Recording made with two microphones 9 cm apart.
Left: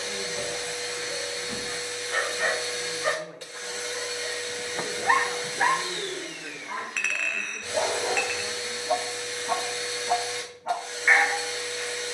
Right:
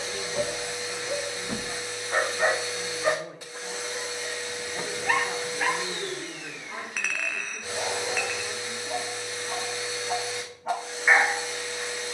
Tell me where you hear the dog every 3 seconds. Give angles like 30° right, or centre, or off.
30° right, 20° left, 50° left, centre.